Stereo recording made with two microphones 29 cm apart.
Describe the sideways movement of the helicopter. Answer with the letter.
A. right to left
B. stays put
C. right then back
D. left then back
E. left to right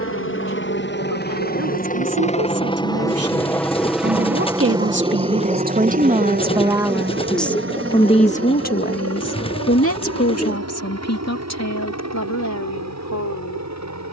E.